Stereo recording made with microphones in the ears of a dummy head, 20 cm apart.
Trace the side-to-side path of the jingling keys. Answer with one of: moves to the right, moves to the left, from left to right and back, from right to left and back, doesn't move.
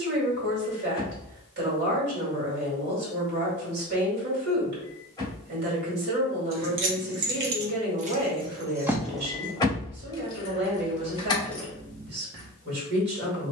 from right to left and back.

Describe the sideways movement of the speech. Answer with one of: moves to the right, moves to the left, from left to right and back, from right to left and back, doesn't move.
doesn't move.